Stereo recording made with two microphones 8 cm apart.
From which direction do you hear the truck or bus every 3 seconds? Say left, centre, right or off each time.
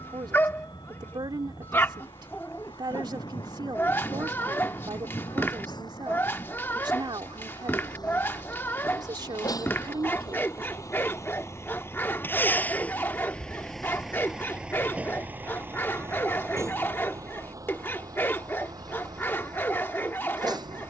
left, left, left, left, centre, right, right.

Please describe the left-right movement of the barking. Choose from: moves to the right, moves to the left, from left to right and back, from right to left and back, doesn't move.
doesn't move.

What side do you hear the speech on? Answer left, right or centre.
right.